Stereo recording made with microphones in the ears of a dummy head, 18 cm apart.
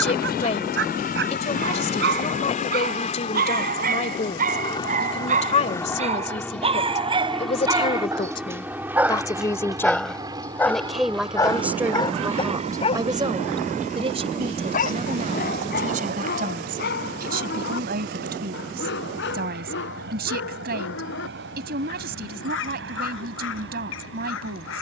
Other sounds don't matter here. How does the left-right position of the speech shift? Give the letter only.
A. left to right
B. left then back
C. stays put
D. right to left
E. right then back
A.